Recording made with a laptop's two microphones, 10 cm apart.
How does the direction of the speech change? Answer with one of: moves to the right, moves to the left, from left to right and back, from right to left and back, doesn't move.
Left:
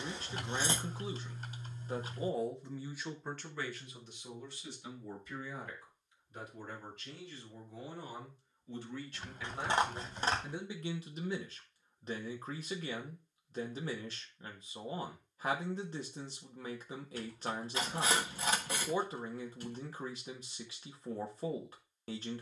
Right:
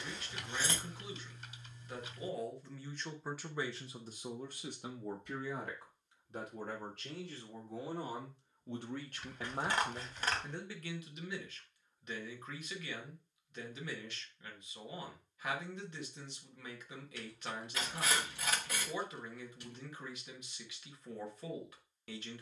from left to right and back.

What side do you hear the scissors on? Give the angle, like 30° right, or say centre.
30° left.